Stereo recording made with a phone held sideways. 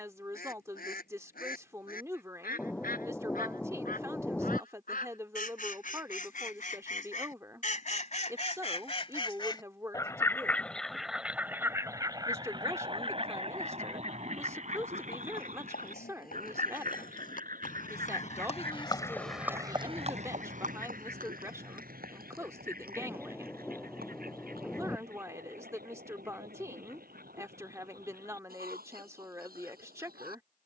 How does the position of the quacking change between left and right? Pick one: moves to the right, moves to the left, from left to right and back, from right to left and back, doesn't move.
moves to the right.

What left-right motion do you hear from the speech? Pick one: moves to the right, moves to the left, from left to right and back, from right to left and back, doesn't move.
doesn't move.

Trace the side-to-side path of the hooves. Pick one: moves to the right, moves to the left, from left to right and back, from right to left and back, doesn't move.
moves to the right.